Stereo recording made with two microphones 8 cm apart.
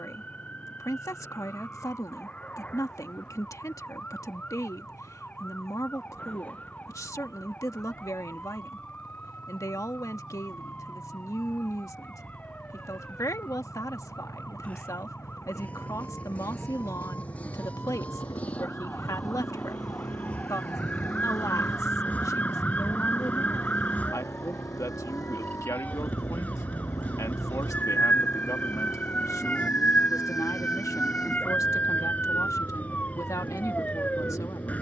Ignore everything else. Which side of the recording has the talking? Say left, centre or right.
left.